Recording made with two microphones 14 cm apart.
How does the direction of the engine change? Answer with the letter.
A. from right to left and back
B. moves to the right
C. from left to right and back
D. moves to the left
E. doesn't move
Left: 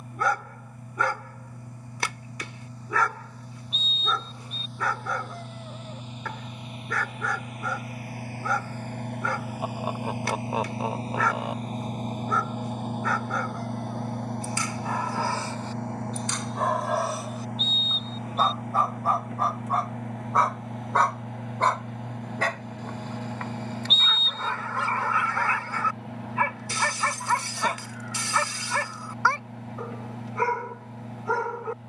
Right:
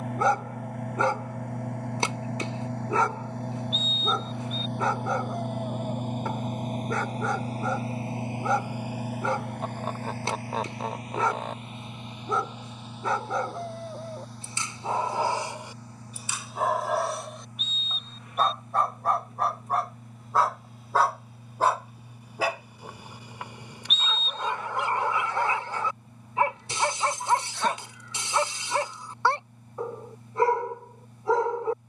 D.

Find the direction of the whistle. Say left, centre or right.
left.